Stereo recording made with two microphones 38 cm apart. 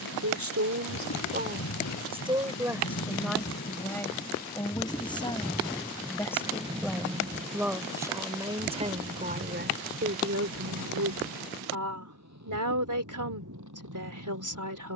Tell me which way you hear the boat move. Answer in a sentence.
You can hear the boat go from the left side to the right.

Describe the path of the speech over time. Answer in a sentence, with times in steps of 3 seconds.
In this clip you hear the speech on the right from 0 s, in the centre from 3 s and on the right from 9 s.